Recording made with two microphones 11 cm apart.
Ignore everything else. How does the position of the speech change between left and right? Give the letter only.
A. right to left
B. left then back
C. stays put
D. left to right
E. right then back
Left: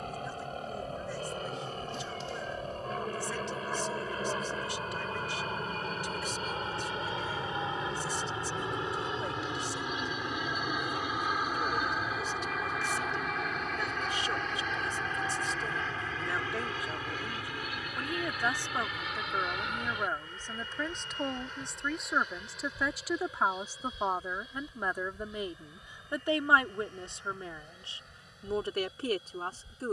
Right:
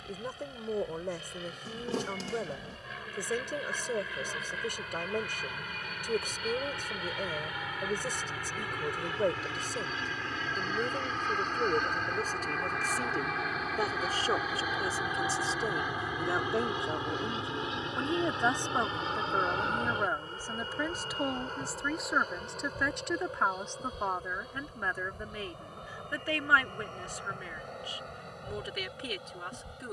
A.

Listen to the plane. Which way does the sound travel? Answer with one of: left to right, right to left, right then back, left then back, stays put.
left to right.